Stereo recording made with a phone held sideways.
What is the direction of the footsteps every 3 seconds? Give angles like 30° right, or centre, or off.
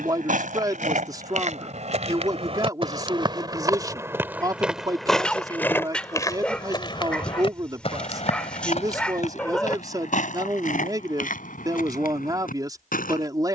50° right, 10° right, 40° left, 60° left, 60° left.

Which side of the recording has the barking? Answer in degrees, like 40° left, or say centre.
10° left.